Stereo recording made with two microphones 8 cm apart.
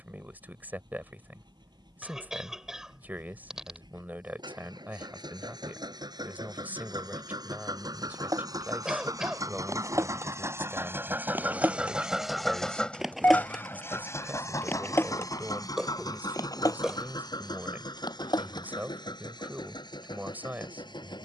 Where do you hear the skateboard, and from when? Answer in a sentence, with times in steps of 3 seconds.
You can hear the skateboard not at all from 0 s, on the right from 6 s, in the centre from 12 s and on the left from 15 s.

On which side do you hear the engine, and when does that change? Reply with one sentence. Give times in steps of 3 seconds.
In this clip you hear the engine on the right from 0 s and on the left from 12 s.